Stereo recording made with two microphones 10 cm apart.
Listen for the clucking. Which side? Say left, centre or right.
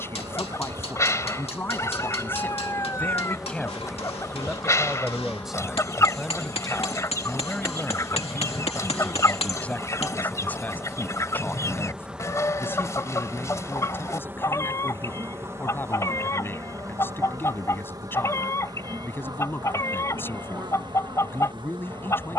left.